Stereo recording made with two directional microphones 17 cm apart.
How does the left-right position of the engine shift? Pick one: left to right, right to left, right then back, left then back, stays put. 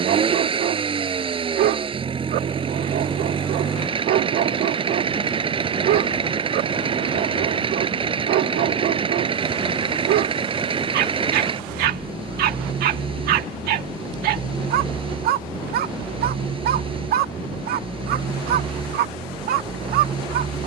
stays put.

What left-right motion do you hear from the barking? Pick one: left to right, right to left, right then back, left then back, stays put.
stays put.